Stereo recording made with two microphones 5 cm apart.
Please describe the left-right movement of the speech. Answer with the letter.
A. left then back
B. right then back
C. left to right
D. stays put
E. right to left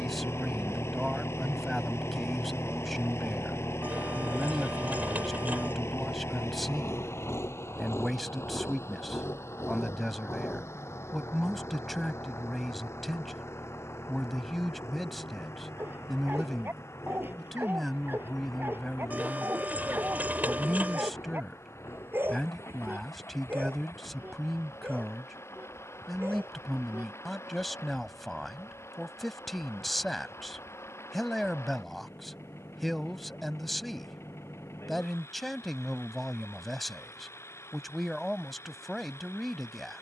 D.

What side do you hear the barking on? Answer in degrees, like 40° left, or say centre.
40° right.